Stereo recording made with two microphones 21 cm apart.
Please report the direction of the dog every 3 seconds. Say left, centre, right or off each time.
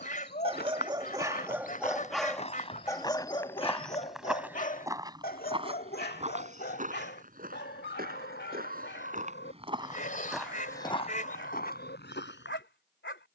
centre, left, left, left, left.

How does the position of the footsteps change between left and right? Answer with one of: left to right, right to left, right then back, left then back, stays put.
right then back.